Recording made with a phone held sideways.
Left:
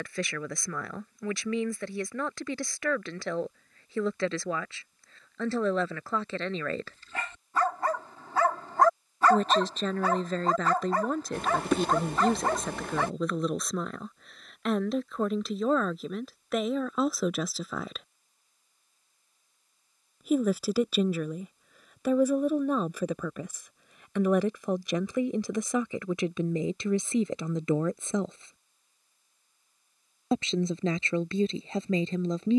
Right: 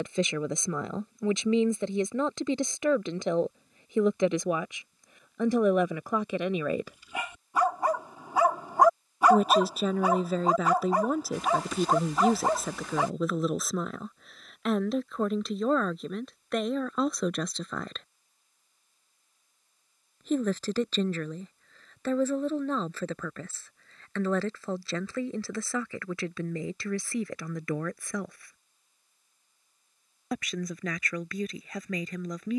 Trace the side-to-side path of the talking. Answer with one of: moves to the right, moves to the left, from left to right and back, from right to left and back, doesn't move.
moves to the left.